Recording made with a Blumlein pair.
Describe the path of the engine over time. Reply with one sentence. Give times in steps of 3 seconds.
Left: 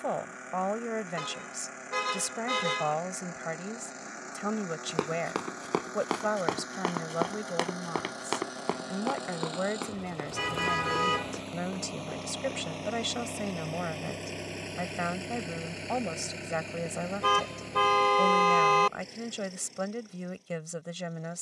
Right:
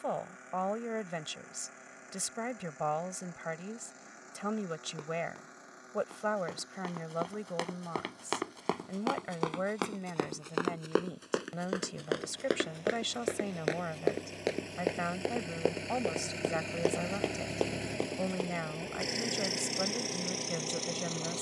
You can hear the engine on the left from 0 s, in the centre from 15 s and on the right from 18 s.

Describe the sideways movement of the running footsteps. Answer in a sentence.
You can hear the running footsteps go from the left side to the right.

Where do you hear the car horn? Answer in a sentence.
You can hear the car horn on the left.